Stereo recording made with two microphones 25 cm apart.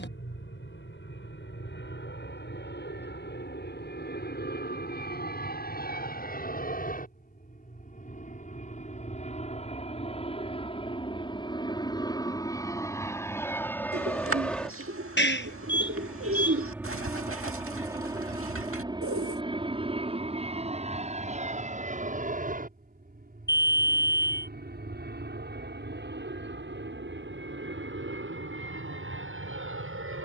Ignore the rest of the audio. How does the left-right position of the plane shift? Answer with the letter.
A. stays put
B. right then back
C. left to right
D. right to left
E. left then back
C.